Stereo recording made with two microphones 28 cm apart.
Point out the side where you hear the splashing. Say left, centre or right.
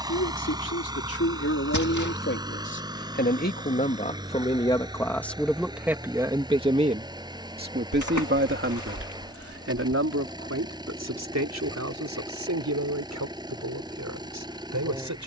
left.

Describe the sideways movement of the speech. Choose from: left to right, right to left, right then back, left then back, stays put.
left to right.